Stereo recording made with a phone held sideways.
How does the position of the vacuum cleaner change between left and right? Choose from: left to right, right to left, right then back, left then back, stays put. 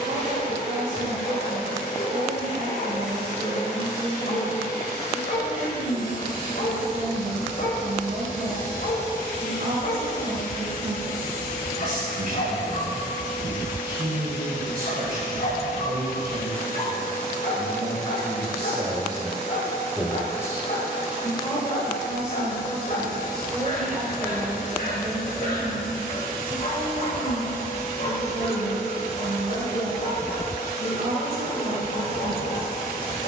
stays put.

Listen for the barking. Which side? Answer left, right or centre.
left.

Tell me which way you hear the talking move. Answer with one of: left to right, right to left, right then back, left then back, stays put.
left then back.